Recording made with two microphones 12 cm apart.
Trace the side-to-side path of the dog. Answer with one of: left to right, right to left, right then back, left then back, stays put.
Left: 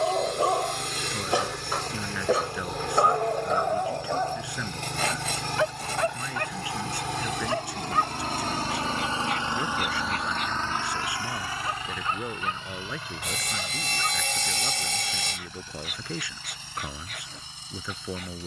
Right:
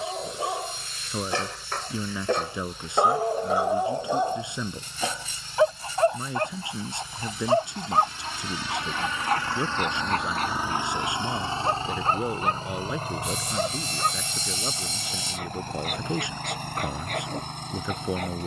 left to right.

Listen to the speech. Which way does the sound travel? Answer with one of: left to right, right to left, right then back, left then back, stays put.
stays put.